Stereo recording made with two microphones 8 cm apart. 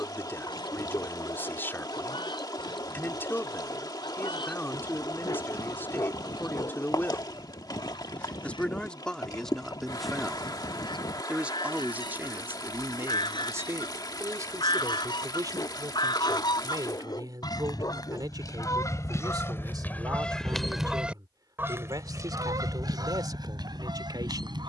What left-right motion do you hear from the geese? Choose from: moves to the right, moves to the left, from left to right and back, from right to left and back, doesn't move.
moves to the right.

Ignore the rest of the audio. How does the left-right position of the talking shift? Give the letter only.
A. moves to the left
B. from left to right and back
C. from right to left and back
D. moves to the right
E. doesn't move
D.